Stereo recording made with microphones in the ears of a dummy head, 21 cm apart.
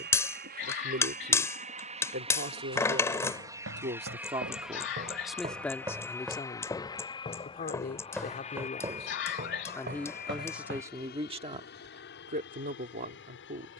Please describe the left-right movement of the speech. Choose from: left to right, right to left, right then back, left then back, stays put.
left then back.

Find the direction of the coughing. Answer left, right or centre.
left.